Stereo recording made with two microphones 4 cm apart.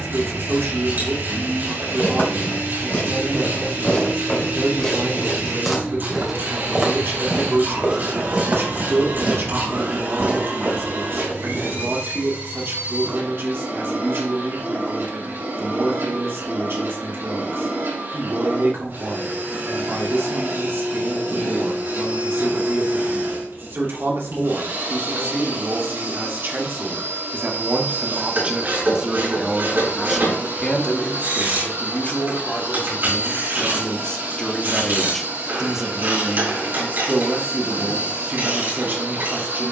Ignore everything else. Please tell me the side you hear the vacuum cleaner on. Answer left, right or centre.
right.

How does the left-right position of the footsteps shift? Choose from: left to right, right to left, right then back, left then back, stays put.
left to right.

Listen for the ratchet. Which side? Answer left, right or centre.
right.